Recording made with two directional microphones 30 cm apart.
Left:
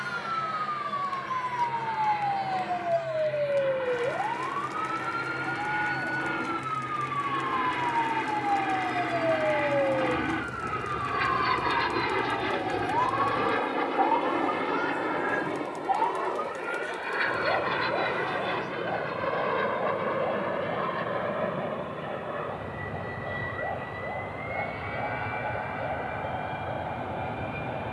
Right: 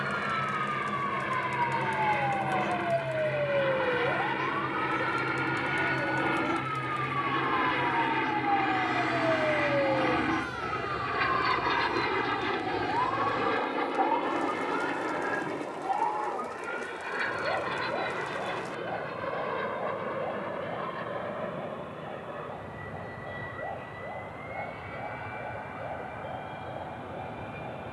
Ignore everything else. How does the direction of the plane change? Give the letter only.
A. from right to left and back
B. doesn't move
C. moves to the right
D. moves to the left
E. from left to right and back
D.